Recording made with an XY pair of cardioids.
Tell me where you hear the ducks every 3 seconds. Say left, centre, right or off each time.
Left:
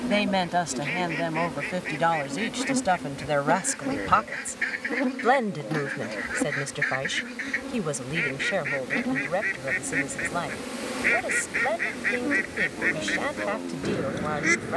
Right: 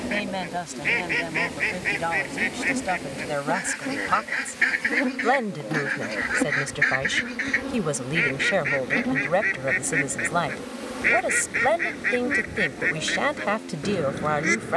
right, right, right, centre, centre.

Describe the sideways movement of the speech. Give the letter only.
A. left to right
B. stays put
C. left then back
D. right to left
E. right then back
A.